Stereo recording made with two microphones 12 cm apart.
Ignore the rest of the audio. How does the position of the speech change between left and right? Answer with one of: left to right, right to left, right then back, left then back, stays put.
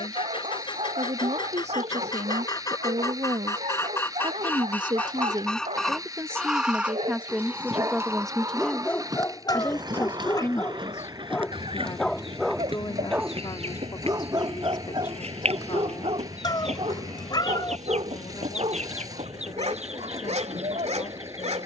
right to left.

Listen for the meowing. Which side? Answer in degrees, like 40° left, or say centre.
40° left.